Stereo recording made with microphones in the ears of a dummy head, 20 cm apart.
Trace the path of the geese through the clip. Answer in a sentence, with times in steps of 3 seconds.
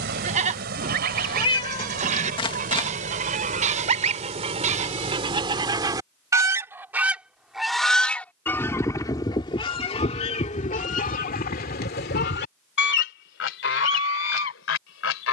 In this clip you hear the geese on the right from 0 s, in the centre from 6 s and on the left from 9 s.